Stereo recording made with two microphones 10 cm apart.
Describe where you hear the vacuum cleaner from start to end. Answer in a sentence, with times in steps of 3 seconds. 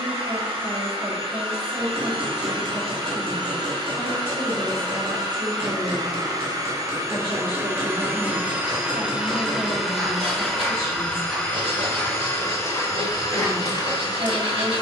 In this clip you hear the vacuum cleaner on the right from 0 s, in the centre from 9 s and on the left from 12 s.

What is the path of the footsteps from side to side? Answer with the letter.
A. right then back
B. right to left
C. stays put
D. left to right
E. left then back
B.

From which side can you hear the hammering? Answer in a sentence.
You can hear the hammering on the right.